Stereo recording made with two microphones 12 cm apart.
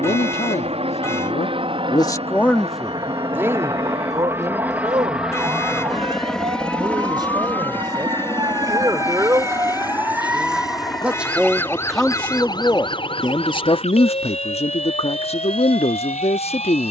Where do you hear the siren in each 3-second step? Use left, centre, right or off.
right, right, right, centre, left, left.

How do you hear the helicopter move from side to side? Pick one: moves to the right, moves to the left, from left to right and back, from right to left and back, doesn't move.
moves to the left.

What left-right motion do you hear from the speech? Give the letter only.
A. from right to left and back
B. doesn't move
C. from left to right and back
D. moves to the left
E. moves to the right
C.